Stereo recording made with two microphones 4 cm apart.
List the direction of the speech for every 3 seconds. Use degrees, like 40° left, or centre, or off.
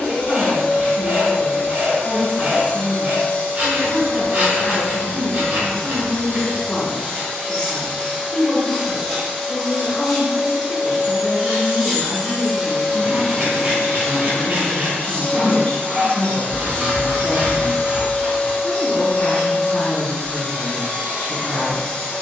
30° left, 30° left, 30° left, 30° left, 30° left, 20° left, 20° right, 40° right.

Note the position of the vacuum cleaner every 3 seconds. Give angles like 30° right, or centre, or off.
40° left, 40° left, 10° left, 10° right, 20° left, 30° left, 30° left, 30° left.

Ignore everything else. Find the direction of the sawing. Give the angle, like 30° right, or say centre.
50° right.